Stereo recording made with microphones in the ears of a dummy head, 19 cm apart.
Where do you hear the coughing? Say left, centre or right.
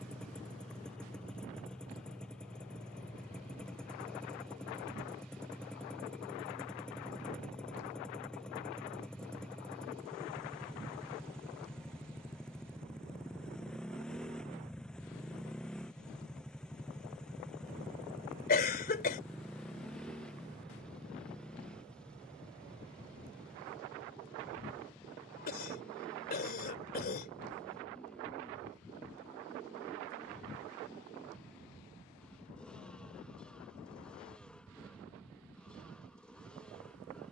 left.